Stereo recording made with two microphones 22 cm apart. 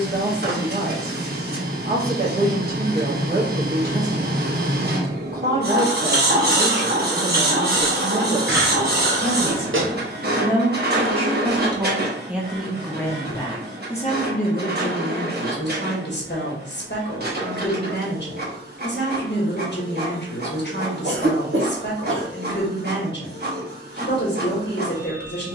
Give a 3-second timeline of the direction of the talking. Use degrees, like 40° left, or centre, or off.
50° right, 50° right, 50° right, 30° right, 20° left, 50° left, 50° left, 50° left, 50° left.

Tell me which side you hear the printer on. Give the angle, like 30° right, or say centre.
50° right.